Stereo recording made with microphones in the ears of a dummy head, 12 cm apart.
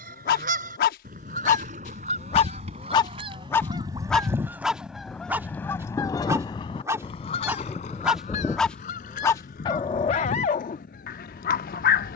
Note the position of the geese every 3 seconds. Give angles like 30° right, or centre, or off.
60° right, 10° right, 50° left, 70° left.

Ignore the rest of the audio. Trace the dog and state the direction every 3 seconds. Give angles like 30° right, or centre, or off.
60° left, centre, 10° right, 50° left.